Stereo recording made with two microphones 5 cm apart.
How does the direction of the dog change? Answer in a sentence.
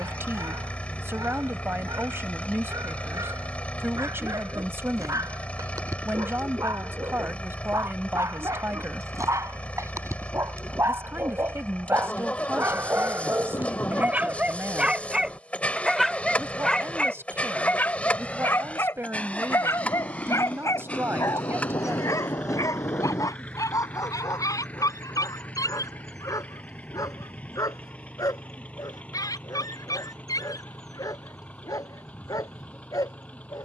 You can hear the dog move from right to left.